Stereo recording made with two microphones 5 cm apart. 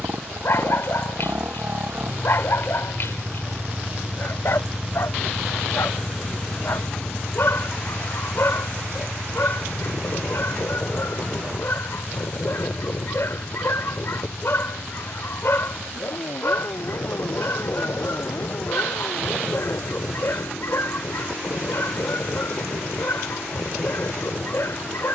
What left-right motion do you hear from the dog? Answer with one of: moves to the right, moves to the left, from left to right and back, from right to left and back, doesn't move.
doesn't move.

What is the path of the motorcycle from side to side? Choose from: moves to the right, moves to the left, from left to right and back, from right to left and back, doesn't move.
moves to the left.